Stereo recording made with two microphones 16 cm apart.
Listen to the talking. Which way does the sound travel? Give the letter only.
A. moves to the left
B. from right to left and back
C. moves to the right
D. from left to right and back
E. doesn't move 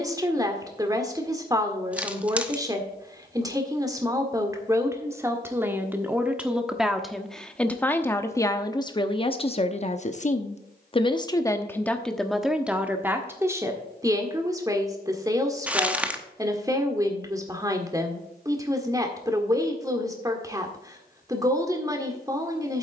B.